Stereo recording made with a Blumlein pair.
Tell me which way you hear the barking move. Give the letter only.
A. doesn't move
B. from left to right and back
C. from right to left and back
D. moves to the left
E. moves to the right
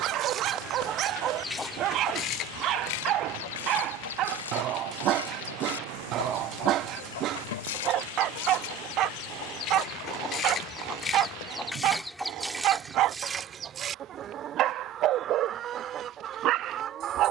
A.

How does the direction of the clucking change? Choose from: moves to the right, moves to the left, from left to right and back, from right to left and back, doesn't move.
from right to left and back.